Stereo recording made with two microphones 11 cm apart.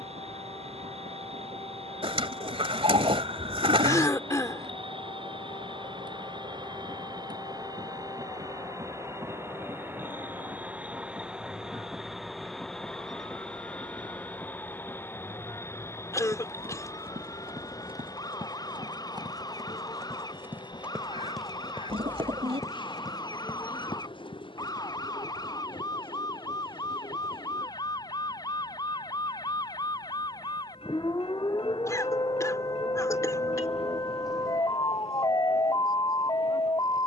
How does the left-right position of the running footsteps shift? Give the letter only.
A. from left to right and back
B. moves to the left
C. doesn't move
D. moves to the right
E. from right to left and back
B.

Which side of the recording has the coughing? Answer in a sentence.
In this clip you hear the coughing on the left.